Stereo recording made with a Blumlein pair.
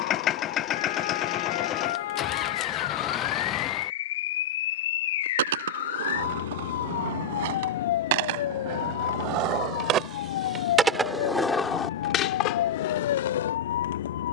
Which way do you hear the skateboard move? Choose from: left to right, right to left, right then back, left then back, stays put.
right to left.